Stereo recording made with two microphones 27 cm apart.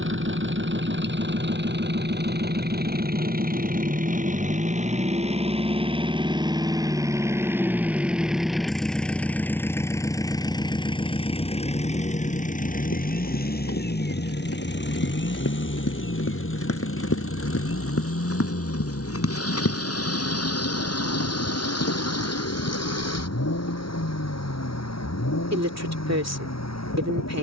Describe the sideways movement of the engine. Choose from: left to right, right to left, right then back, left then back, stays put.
right to left.